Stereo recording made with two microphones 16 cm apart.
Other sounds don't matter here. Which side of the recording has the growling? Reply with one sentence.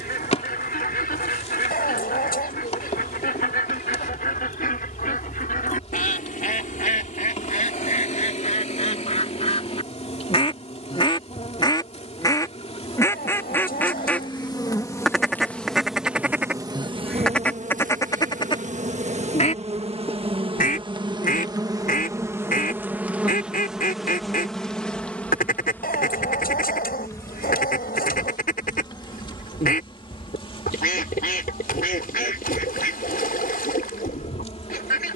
You can hear the growling on the left.